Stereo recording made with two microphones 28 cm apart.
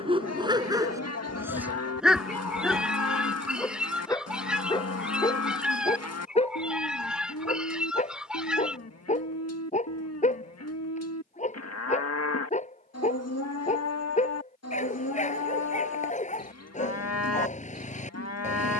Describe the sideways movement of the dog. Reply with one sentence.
In this clip you hear the dog travel towards the left.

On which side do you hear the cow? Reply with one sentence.
You can hear the cow on the left.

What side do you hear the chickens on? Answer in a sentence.
In this clip you hear the chickens in the centre.